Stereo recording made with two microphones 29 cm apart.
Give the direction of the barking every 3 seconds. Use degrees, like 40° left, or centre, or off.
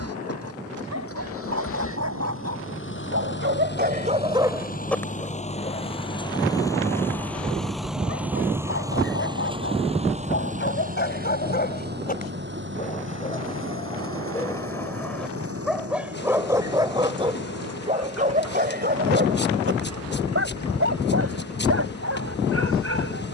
60° right, 10° right, 50° left, 40° left, 20° left, 10° right, 40° right, 50° right.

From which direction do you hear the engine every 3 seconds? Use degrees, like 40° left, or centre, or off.
50° left, 30° left, centre, 20° right, 40° right, 50° right, 60° right, 70° right.